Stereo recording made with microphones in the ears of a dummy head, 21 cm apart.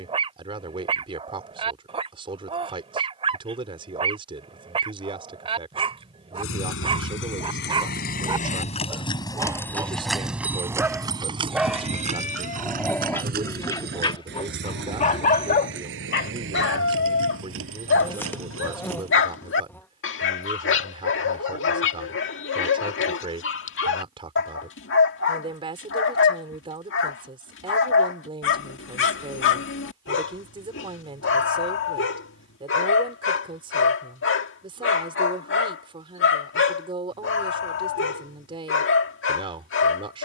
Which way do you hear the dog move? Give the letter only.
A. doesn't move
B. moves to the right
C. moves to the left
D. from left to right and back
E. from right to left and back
C.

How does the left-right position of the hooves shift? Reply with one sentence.
You can hear the hooves travel towards the right.